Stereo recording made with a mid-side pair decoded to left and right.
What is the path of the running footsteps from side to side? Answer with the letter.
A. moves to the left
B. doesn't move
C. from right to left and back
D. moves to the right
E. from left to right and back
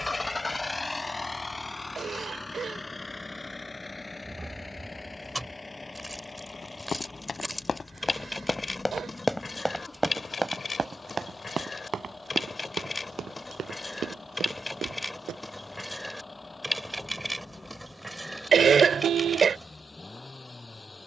D.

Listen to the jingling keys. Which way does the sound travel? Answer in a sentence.
In this clip you hear the jingling keys move from right to left and back again.